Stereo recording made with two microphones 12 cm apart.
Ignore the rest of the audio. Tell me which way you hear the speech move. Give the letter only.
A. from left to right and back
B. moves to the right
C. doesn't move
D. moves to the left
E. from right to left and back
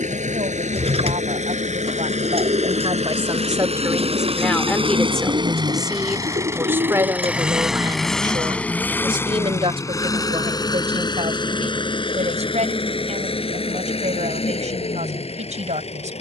E.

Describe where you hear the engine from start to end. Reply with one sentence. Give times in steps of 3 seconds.
You can hear the engine on the right from 0 s, in the centre from 6 s and on the left from 9 s.